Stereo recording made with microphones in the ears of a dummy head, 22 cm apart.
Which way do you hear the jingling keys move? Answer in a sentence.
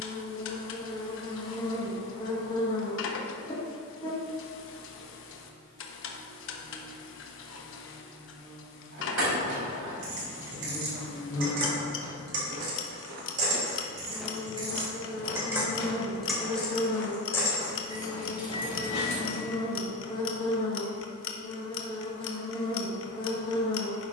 In this clip you hear the jingling keys travel towards the left.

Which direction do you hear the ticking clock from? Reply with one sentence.
You can hear the ticking clock on the left.